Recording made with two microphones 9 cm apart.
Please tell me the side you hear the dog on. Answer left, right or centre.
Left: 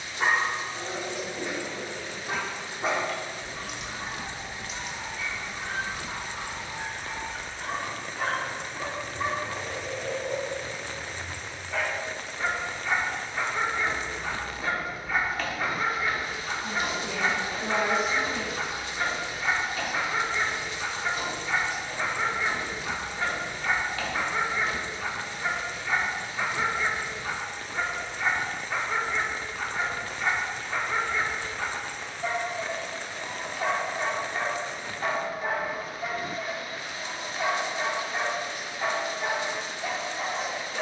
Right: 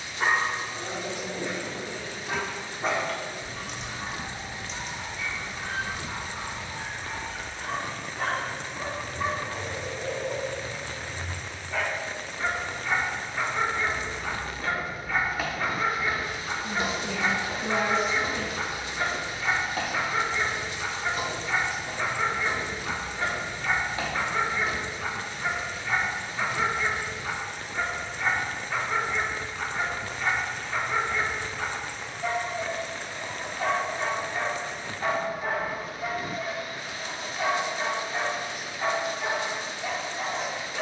centre.